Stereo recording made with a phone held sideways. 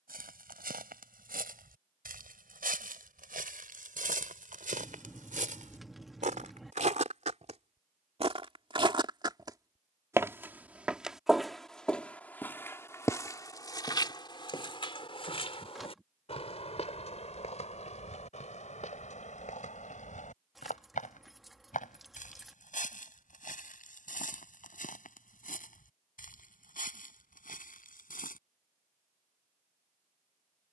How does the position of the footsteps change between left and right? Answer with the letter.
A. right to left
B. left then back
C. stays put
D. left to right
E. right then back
A.